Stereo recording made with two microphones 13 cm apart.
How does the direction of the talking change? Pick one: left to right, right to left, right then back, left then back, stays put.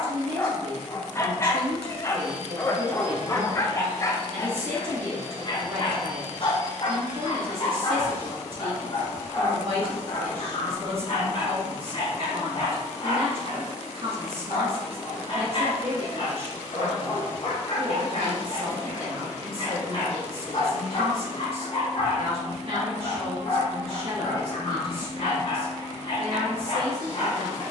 stays put.